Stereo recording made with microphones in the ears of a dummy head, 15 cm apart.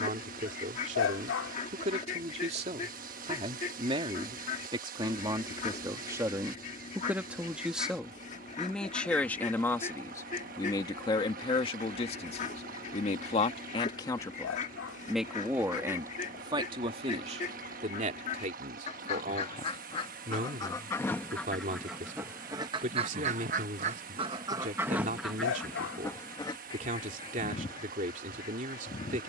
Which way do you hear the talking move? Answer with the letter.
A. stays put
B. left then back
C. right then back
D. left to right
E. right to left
B.